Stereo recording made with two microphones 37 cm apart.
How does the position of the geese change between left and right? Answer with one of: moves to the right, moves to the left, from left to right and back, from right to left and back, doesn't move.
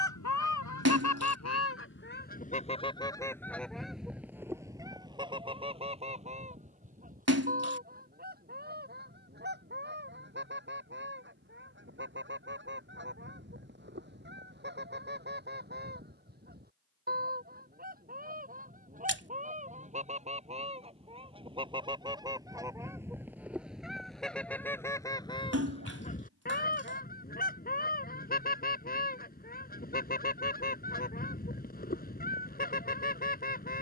from left to right and back.